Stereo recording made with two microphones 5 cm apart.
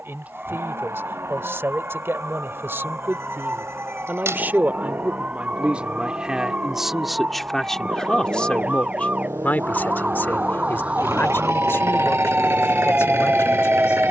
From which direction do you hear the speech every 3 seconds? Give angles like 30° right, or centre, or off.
60° right, 40° right, centre, 50° left, 60° left.